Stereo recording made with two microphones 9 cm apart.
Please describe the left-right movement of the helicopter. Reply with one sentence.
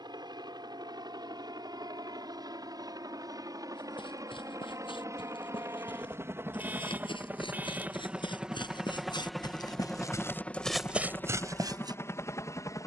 You can hear the helicopter move to the left.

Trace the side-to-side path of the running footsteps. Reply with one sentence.
In this clip you hear the running footsteps go from the left side to the right.